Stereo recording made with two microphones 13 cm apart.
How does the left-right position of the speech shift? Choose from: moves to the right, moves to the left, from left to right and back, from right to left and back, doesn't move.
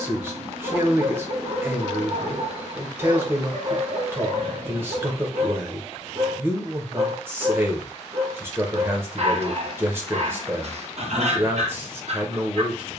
doesn't move.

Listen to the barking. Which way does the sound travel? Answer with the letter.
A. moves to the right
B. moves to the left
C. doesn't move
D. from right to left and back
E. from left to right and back
C.